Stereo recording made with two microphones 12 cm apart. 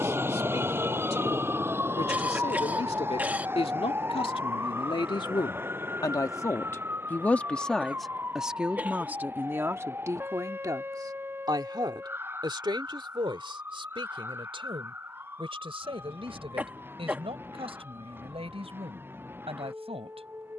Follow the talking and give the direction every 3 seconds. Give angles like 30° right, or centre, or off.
70° left, 50° left, 10° left, 30° right, 50° right, 60° right, 60° right.